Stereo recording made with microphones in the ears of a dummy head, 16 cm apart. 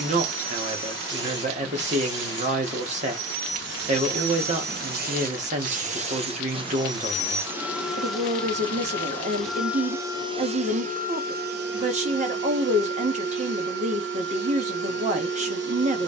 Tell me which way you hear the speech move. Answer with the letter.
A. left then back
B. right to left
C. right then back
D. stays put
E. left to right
D.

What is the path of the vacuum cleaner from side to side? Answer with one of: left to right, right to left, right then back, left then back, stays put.
left then back.